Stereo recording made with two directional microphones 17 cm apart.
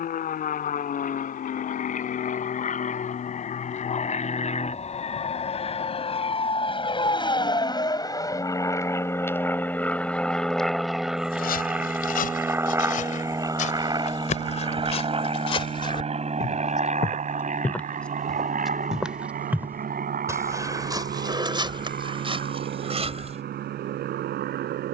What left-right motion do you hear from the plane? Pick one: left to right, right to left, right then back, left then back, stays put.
left to right.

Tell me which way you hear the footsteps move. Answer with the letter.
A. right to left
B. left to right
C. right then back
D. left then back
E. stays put
B.